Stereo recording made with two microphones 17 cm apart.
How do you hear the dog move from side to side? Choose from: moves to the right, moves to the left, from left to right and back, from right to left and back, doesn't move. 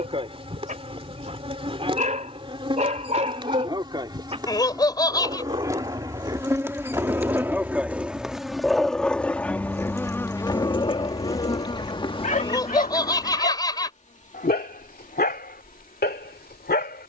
moves to the left.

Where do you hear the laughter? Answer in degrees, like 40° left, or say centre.
20° left.